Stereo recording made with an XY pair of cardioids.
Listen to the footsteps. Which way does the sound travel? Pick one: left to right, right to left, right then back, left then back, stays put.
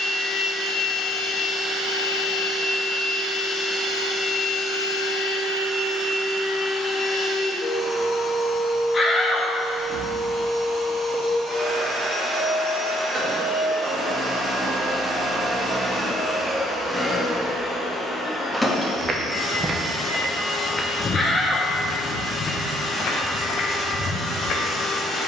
right to left.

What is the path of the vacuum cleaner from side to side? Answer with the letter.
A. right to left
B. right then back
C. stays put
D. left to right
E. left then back
B.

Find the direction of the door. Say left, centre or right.
left.